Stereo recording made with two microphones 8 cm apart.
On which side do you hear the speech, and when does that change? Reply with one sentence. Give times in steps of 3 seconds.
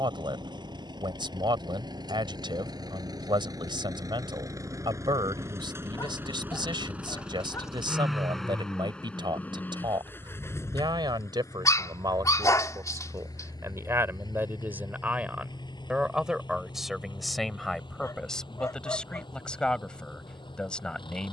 You can hear the speech on the right from 0 s and in the centre from 15 s.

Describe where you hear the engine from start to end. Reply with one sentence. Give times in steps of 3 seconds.
You can hear the engine on the right from 0 s, in the centre from 6 s and on the left from 9 s.